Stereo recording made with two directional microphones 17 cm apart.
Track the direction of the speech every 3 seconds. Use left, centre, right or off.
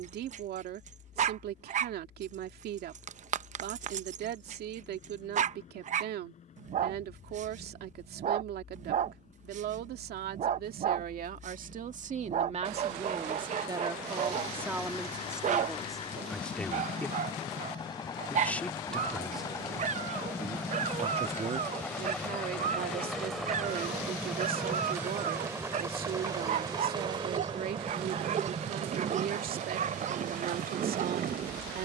right, right, right, right, right, centre, centre, right, right, right, right.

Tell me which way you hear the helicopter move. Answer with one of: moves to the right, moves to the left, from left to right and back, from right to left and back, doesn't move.
moves to the right.